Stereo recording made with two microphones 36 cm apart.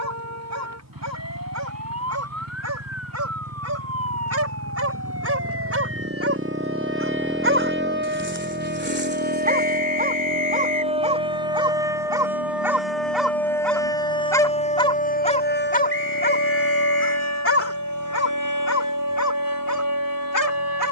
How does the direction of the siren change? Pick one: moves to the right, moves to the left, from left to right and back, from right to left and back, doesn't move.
moves to the left.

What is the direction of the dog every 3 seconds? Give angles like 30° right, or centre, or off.
50° right, 40° right, 30° right, 20° right, centre, 30° left, 50° left.